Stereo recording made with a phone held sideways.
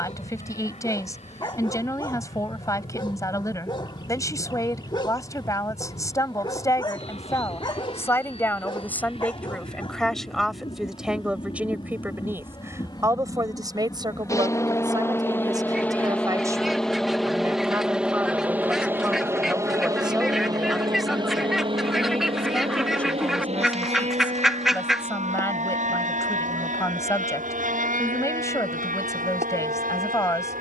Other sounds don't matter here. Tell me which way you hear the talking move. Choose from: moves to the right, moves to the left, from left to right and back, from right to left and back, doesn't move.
from left to right and back.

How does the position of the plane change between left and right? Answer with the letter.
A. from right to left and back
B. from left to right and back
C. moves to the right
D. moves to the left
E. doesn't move
C.